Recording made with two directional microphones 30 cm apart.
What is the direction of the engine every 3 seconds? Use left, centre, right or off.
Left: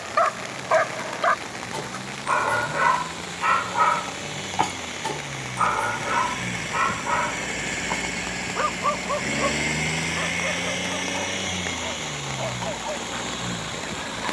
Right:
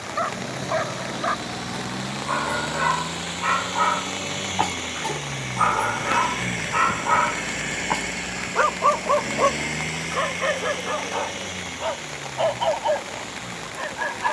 right, right, centre, left, left.